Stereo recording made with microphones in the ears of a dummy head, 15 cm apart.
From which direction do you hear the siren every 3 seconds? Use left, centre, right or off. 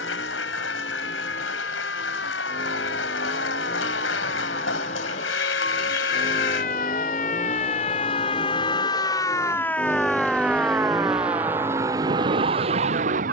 left, left, left, centre, right.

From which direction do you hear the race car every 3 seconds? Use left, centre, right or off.
left, left, left, centre, right.